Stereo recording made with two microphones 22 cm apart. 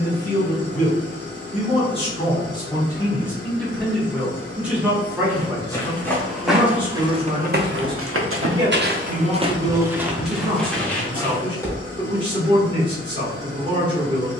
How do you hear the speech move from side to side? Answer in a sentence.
In this clip you hear the speech move to the right.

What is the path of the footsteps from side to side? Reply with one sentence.
In this clip you hear the footsteps go right and come back.